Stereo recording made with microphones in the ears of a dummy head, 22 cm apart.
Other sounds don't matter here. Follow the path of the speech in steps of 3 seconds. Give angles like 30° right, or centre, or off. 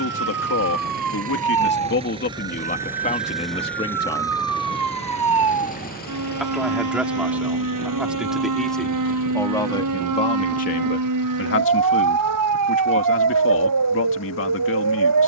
50° left, 30° left, centre, 40° left, 60° left.